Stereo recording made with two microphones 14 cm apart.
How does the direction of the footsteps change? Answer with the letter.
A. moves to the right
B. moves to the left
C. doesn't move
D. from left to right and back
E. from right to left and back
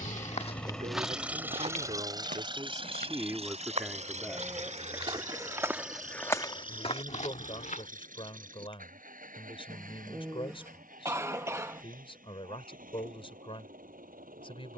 D.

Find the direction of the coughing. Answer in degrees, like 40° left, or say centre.
20° right.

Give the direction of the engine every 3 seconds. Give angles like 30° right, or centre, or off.
10° right, 60° right, 70° right, 80° right, 80° right.